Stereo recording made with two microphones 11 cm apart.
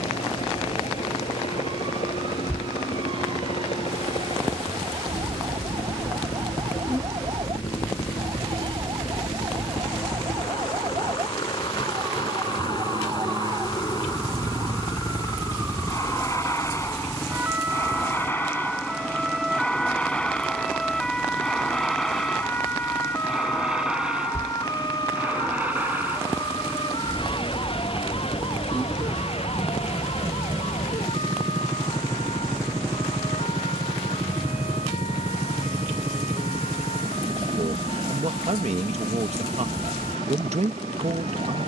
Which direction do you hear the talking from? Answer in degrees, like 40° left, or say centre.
80° right.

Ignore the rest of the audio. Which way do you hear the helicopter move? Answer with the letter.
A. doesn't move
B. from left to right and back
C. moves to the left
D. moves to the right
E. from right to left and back
D.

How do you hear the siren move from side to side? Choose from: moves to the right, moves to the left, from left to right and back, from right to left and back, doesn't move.
moves to the left.